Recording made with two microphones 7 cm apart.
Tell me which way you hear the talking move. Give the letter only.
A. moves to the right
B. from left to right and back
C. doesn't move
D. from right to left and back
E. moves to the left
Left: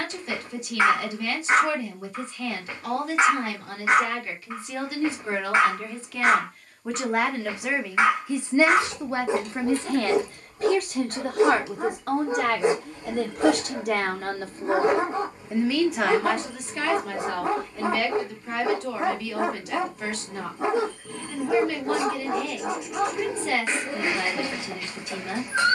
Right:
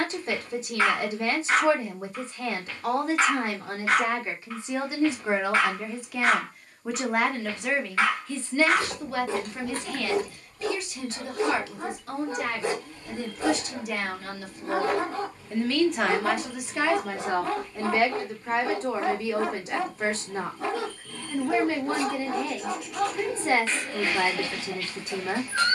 D.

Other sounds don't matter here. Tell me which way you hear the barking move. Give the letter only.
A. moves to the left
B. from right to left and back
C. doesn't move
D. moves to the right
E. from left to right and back
C.